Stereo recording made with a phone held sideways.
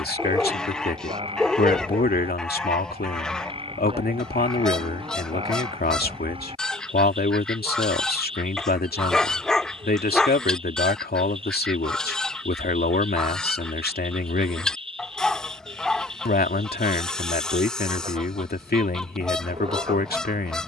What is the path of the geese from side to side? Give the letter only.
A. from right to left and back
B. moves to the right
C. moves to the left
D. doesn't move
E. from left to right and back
D.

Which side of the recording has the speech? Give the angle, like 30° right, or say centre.
80° left.